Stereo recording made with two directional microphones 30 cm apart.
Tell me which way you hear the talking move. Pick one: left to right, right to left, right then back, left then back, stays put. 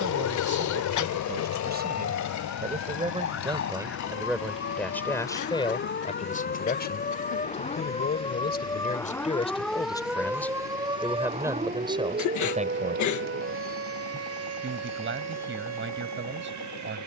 left then back.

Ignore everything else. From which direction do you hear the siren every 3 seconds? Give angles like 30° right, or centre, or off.
50° left, 40° left, 20° left, 10° right, 40° right, 60° right.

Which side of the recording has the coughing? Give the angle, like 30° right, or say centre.
70° left.